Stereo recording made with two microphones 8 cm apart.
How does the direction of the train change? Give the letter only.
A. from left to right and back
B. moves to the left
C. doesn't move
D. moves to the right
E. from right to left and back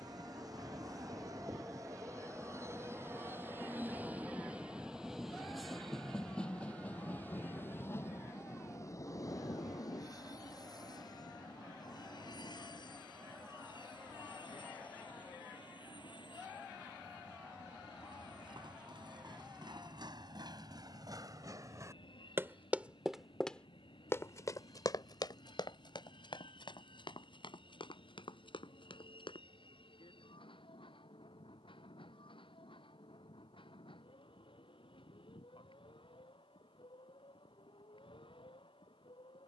B.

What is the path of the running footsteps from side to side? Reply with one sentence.
In this clip you hear the running footsteps move to the left.